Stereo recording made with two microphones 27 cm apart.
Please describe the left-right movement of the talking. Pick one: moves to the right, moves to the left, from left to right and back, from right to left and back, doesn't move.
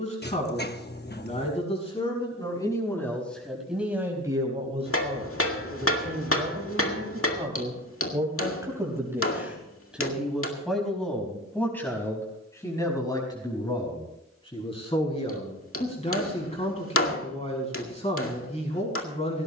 from left to right and back.